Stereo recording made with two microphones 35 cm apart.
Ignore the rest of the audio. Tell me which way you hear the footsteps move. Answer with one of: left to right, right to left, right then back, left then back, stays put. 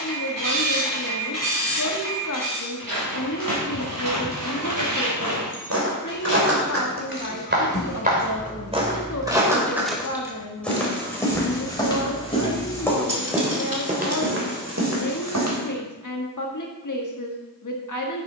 left then back.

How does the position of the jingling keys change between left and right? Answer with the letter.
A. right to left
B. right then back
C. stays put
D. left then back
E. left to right
E.